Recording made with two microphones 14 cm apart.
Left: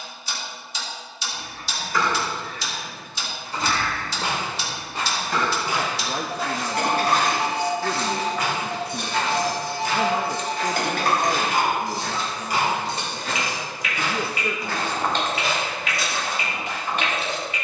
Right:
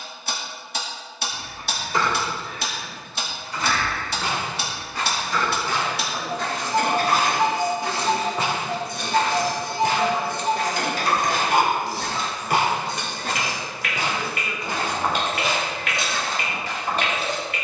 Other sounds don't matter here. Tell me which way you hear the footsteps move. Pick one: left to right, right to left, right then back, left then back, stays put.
right then back.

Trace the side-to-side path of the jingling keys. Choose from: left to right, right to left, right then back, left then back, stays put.
left then back.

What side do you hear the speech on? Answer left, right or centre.
left.